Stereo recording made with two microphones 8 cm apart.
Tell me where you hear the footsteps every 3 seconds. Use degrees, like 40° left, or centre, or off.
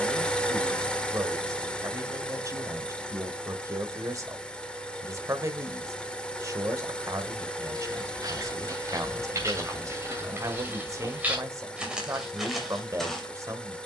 off, off, 50° right, 30° right, centre.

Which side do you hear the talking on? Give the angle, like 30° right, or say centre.
40° right.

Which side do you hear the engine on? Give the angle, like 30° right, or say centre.
10° left.